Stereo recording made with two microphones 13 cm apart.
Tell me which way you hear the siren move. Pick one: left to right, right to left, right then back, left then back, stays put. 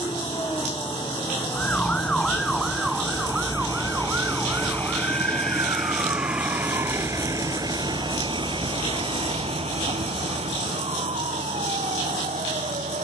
left to right.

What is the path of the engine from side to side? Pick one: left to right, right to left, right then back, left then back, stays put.
left to right.